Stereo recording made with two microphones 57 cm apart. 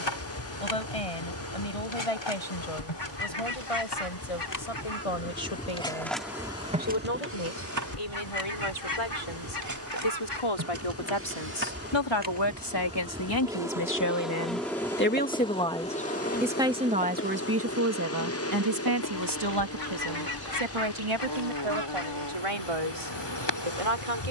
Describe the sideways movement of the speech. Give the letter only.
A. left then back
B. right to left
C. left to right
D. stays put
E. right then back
C.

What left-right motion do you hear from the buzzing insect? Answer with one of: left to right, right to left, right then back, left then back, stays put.
right then back.